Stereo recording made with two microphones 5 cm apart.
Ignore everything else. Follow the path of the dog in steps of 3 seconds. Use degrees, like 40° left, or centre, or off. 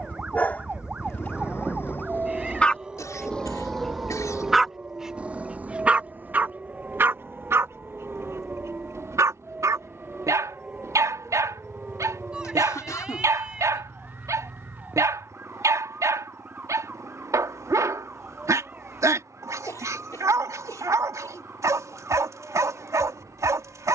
30° left, centre, 60° right, 70° right, 70° right, 70° right, 70° right, 70° right.